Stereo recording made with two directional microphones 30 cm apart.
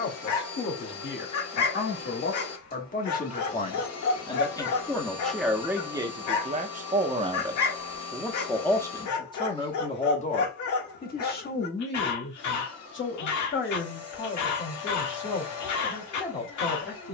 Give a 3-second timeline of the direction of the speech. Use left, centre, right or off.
left, centre, centre, left, left, left.